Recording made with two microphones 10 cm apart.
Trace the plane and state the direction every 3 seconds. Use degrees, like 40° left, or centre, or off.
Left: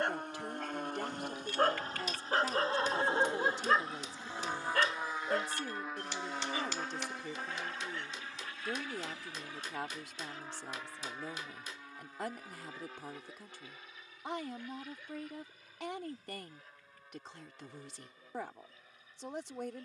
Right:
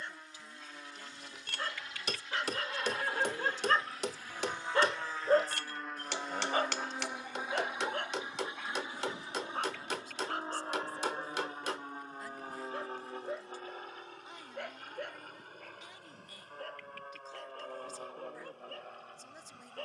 40° left, 20° left, 10° right, 30° right, 40° right, 50° right, 50° right.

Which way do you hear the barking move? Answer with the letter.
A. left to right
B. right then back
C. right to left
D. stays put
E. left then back
A.